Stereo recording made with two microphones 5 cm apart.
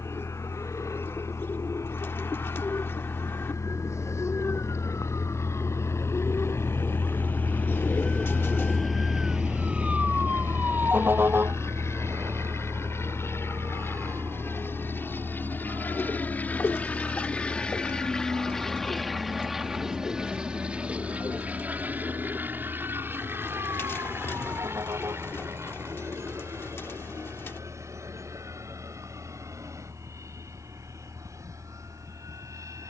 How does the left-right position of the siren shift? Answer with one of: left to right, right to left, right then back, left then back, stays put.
left to right.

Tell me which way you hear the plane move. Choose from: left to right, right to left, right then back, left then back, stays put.
left to right.